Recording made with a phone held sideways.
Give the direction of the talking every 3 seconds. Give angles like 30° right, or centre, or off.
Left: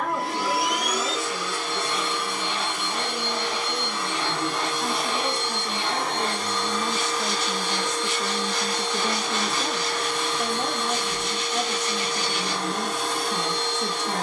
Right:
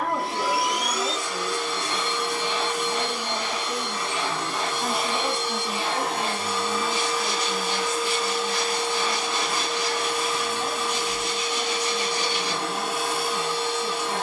20° right, 10° right, 30° left, 70° left, 80° left.